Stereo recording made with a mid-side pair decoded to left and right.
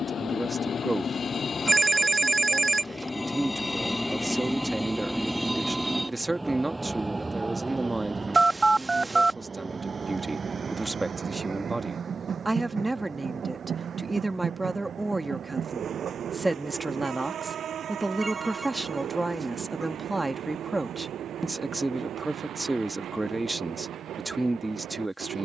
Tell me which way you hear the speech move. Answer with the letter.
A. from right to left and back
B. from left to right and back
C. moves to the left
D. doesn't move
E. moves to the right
D.